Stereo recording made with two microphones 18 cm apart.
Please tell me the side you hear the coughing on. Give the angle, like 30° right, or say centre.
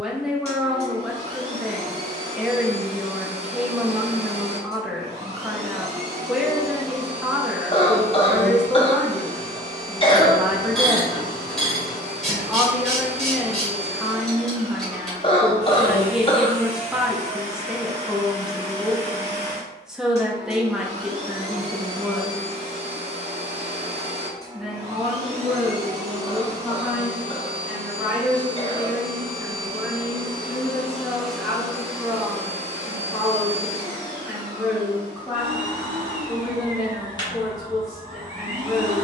30° left.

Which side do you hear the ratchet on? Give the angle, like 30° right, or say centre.
centre.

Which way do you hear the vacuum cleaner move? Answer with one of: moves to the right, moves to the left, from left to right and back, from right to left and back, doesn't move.
moves to the left.